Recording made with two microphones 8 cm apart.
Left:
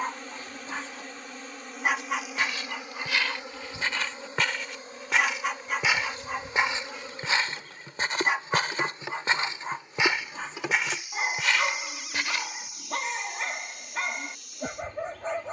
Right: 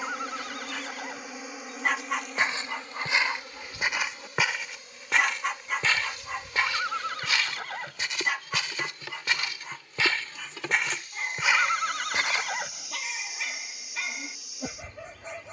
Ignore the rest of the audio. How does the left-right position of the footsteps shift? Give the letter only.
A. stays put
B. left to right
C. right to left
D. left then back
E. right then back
D.